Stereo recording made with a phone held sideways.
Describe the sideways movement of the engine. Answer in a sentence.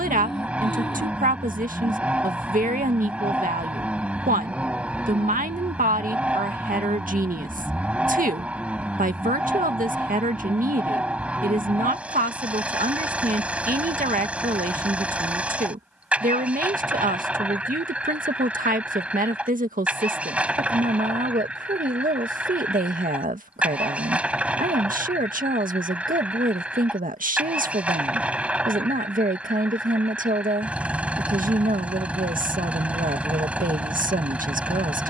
In this clip you hear the engine stay in one place.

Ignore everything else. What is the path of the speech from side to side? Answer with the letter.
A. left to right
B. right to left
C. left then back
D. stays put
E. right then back
D.